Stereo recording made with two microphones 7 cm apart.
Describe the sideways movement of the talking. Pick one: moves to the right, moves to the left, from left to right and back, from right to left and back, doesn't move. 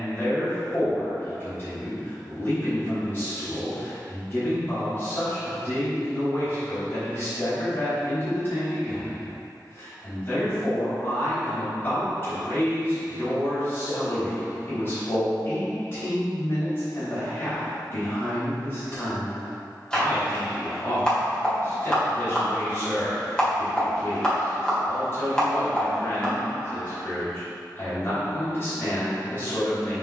doesn't move.